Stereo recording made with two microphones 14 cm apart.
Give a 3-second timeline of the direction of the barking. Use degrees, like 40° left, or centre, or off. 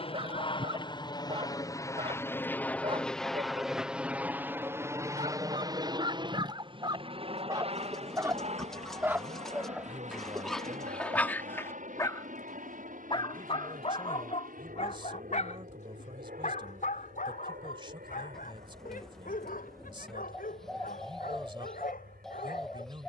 40° right, 40° right, 30° right, centre, 40° left, 60° left, 80° left, 80° left.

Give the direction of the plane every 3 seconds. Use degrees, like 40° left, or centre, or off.
30° left, 10° right, 40° right, 50° right, 60° right, 60° right, 70° right, 70° right.